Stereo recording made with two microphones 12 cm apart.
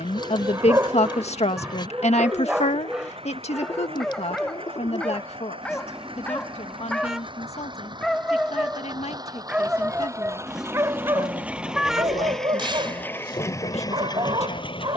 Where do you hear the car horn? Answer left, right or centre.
centre.